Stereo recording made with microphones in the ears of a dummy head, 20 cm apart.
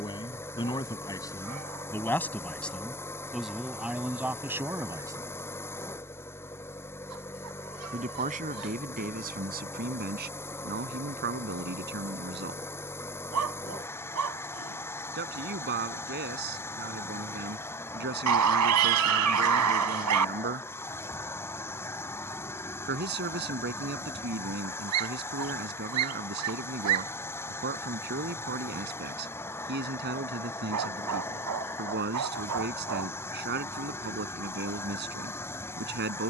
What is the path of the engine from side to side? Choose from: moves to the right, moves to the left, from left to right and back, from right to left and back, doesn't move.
doesn't move.